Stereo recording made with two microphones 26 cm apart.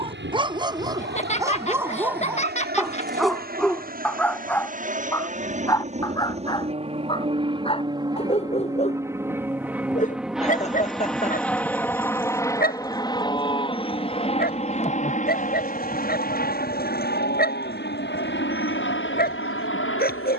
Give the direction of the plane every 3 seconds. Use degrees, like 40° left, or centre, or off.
40° right, 30° right, 20° right, centre, 20° left, 30° left, 50° left.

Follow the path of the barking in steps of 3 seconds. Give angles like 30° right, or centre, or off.
10° right, 10° left, 20° left, 30° left, 40° left, 40° left, 40° left.